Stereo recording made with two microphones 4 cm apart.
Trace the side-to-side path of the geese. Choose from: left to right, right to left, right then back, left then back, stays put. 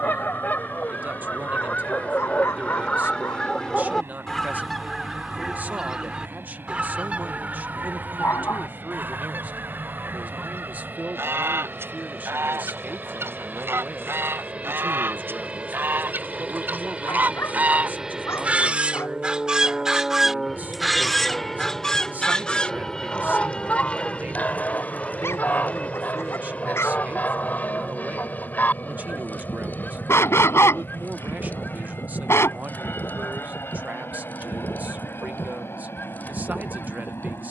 right then back.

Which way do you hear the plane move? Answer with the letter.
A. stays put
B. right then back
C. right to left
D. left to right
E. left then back
C.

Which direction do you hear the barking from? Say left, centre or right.
left.